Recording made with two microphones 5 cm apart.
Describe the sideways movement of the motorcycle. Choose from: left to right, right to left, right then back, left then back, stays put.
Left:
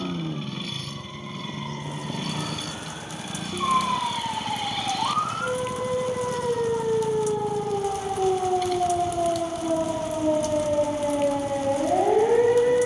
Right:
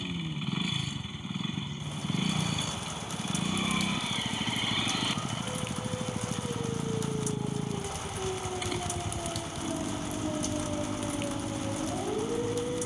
stays put.